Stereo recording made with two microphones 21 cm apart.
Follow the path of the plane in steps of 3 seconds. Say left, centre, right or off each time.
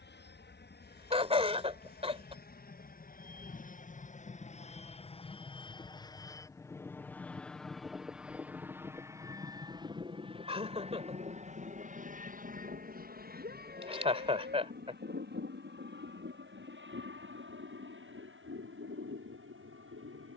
left, left, centre, right, right, right, right.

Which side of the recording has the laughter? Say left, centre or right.
right.